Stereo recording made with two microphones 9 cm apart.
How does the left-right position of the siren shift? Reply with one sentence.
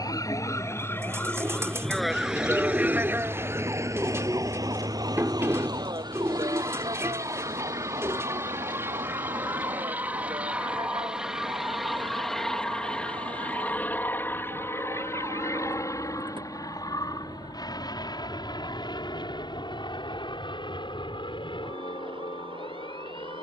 You can hear the siren go from the left side to the right.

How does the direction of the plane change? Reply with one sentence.
You can hear the plane go from the right side to the left.